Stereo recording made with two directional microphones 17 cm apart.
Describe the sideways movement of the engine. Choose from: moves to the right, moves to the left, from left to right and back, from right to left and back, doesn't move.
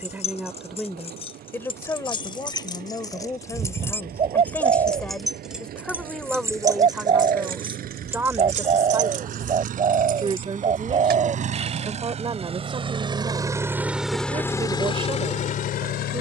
moves to the left.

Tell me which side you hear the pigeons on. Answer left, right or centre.
right.